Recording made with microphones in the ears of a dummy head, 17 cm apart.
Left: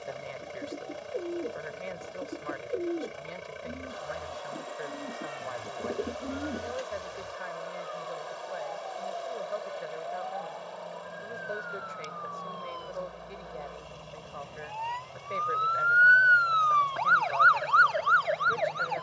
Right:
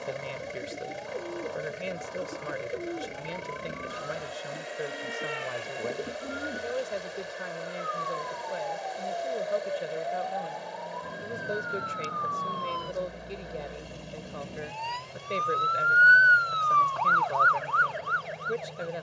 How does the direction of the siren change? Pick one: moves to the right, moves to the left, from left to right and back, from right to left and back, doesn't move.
moves to the left.